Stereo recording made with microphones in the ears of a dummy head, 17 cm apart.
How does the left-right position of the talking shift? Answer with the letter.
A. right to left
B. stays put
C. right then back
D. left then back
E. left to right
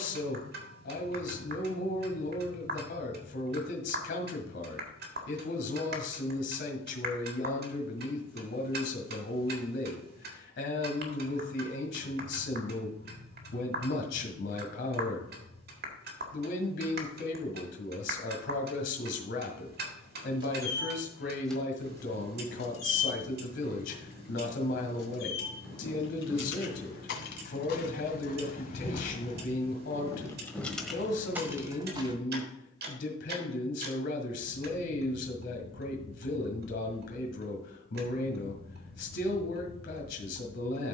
B.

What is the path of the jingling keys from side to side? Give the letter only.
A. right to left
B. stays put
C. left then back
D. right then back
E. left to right
C.